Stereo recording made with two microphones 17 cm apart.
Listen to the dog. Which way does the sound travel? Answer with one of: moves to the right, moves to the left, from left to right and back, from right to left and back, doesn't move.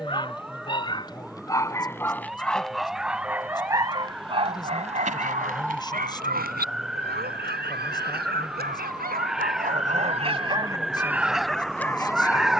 from left to right and back.